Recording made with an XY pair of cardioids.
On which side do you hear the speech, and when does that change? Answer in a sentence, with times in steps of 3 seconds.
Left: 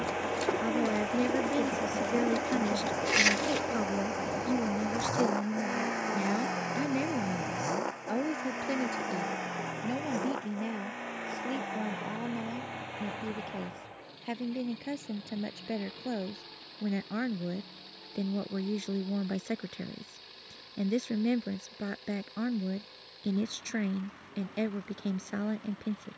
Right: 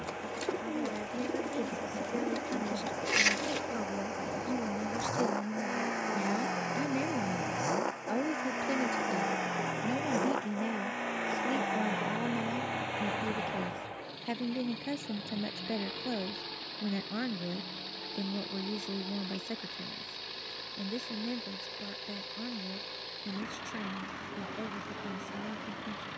In this clip you hear the speech on the left from 0 s, in the centre from 6 s and on the left from 18 s.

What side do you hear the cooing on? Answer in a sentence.
In this clip you hear the cooing in the centre.